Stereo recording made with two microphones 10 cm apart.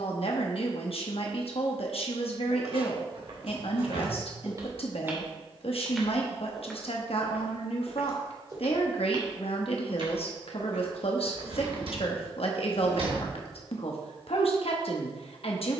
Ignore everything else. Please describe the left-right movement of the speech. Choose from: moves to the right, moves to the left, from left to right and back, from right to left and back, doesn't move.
doesn't move.